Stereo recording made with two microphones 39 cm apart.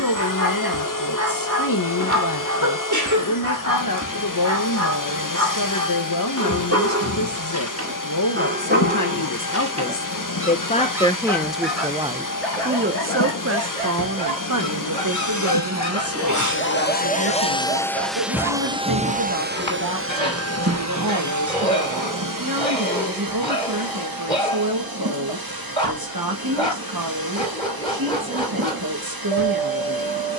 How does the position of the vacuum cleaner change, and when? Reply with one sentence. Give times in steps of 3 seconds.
In this clip you hear the vacuum cleaner on the left from 0 s and on the right from 18 s.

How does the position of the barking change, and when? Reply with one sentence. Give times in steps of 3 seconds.
In this clip you hear the barking on the right from 0 s and in the centre from 9 s.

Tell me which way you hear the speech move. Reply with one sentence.
You can hear the speech move to the right.